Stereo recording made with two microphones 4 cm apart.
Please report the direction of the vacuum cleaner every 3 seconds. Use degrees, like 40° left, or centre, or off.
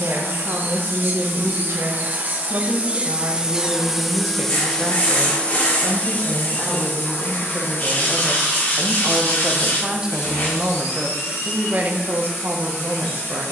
50° right, 10° left, 50° left, 70° left, 70° left.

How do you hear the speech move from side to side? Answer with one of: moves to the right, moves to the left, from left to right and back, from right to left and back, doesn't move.
from right to left and back.